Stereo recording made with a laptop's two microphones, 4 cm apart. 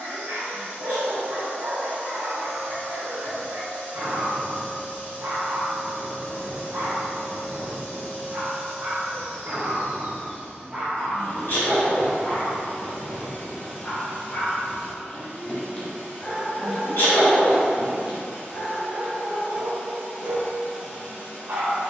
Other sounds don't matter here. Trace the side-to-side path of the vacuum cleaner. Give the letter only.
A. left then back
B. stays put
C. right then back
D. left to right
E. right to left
B.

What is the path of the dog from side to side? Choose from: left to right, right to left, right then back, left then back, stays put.
left then back.